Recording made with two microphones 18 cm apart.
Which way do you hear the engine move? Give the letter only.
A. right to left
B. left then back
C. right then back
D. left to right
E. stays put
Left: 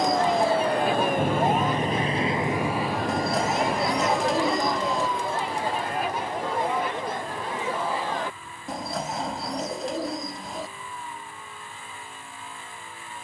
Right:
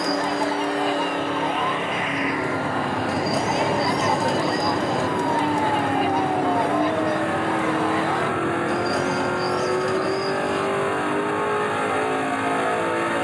E.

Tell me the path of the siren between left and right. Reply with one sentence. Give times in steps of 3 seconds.
In this clip you hear the siren on the left from 0 s and on the right from 3 s.